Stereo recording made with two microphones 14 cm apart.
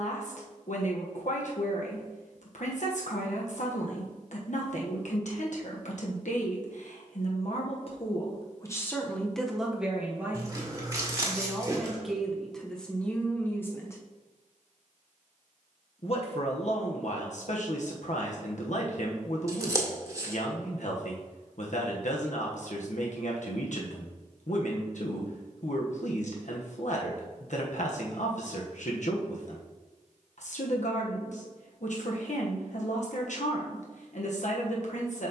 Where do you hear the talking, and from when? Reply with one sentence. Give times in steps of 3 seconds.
You can hear the talking on the left from 0 s, in the centre from 9 s and on the left from 15 s.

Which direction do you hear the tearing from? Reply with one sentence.
In this clip you hear the tearing on the right.